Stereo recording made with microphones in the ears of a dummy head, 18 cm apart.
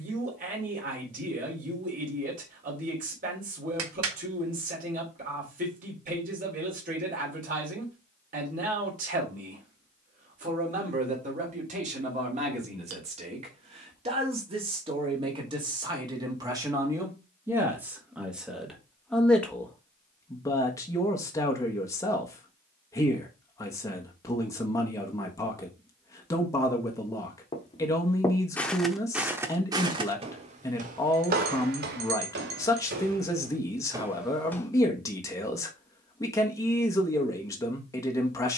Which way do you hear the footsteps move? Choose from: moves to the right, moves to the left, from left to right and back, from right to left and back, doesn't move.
from left to right and back.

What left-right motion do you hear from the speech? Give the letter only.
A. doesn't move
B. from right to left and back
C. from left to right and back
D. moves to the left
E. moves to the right
D.